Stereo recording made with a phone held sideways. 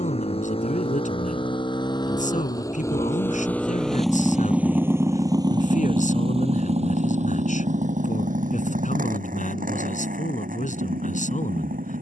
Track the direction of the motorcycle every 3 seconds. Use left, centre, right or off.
left, centre, right, right.